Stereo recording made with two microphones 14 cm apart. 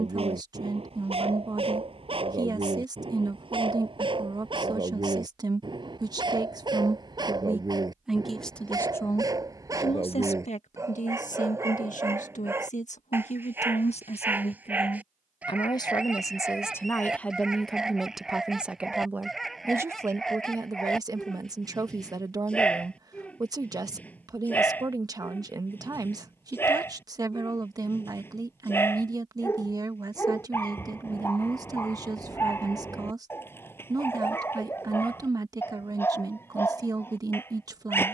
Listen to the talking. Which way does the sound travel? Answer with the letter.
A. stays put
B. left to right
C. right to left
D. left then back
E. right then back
D.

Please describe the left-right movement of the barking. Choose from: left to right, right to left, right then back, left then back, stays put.
right to left.